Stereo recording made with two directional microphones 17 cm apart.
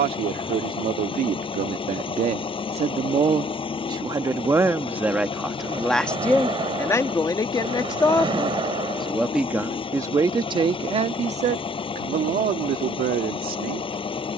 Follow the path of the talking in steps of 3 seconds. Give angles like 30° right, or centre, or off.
50° right, 20° right, 20° left, 20° right, 60° right.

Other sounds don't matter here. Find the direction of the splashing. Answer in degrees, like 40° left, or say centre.
30° right.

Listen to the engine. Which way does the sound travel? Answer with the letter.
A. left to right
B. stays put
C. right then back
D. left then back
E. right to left
B.